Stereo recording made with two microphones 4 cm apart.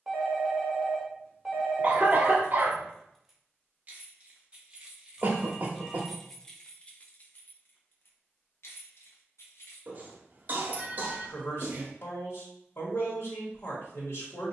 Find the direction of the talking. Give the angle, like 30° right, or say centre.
70° left.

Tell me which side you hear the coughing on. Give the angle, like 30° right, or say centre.
40° right.